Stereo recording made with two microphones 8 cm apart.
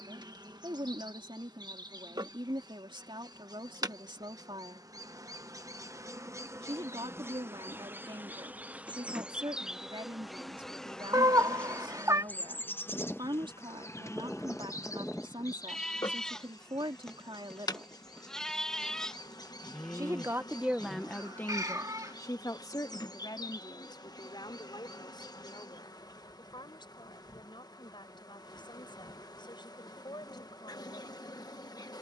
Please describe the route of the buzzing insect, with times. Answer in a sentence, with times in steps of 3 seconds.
You can hear the buzzing insect on the right from 0 s, in the centre from 9 s and on the left from 12 s.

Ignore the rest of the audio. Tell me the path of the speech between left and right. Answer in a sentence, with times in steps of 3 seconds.
In this clip you hear the speech on the right from 0 s and on the left from 21 s.